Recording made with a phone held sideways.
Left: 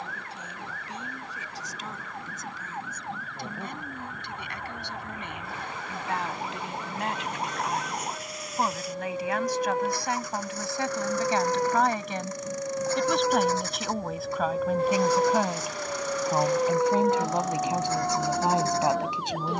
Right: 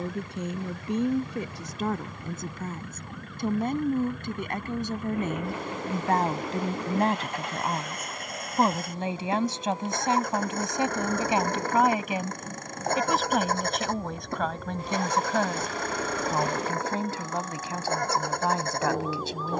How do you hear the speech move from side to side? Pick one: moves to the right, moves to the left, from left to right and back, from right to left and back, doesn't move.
moves to the left.